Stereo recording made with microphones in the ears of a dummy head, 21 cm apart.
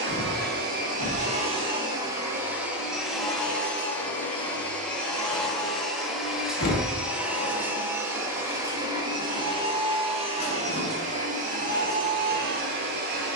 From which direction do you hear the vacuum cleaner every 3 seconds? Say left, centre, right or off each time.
right, centre, centre, right, right.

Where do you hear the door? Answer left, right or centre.
left.